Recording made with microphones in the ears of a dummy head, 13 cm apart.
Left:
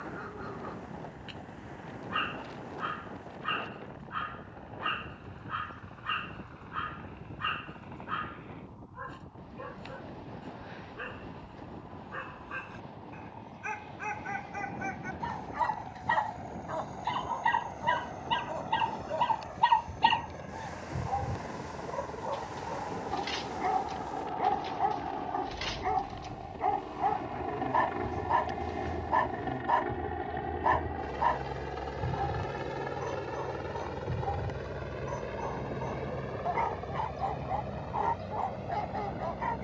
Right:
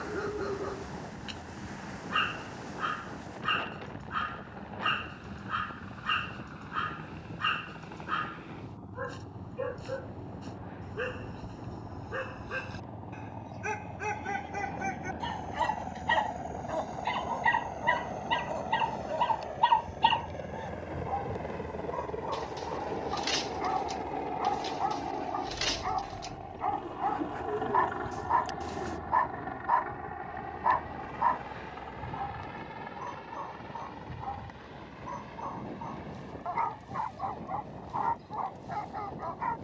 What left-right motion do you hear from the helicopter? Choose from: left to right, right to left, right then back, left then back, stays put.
right to left.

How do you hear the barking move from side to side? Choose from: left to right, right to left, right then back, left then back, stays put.
right to left.